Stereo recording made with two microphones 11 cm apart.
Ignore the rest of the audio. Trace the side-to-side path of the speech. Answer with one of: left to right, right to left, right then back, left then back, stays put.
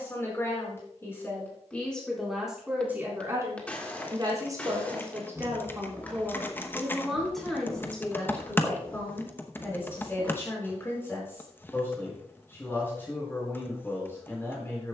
right then back.